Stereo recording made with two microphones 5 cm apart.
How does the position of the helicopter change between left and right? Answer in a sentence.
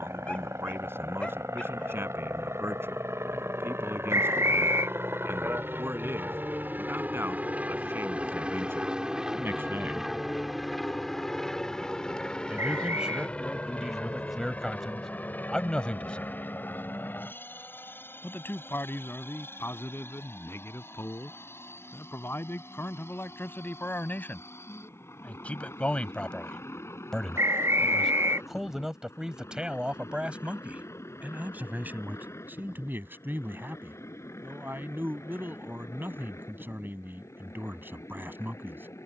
In this clip you hear the helicopter move to the left.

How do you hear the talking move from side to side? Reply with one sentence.
In this clip you hear the talking move from right to left and back again.